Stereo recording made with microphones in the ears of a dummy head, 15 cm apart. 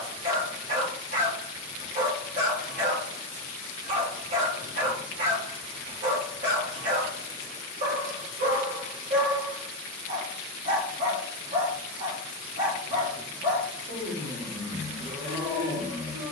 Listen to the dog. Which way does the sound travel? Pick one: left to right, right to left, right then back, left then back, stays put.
stays put.